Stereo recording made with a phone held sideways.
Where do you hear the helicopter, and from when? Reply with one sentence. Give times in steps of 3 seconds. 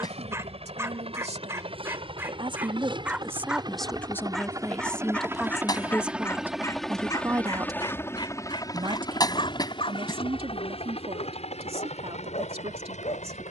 You can hear the helicopter on the right from 0 s, in the centre from 6 s and on the left from 9 s.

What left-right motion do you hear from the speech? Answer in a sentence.
In this clip you hear the speech move from right to left and back again.